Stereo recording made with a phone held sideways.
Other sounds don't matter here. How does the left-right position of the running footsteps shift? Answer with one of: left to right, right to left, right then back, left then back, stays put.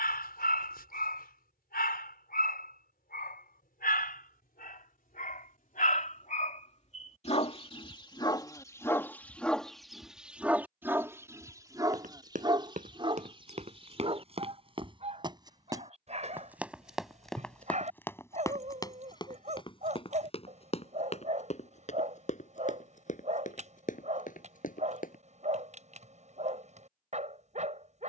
right to left.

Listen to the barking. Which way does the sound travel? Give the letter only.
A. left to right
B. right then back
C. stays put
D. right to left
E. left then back
A.